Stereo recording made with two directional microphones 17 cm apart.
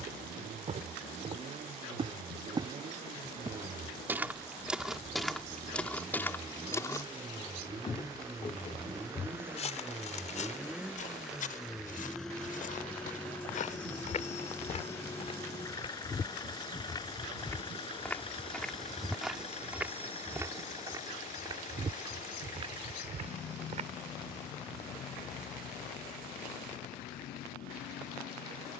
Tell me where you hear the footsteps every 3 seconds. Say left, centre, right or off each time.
right, centre, left, left, left, left, centre, right, off, off.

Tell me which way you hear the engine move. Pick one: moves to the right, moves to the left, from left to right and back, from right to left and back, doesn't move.
moves to the left.